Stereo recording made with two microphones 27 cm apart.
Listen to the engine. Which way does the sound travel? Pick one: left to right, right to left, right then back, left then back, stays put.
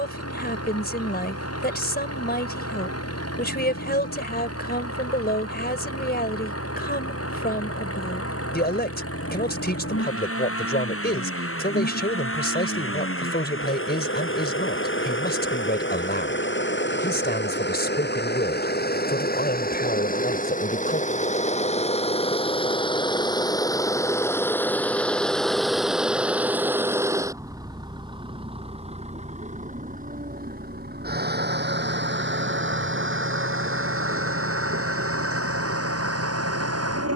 left to right.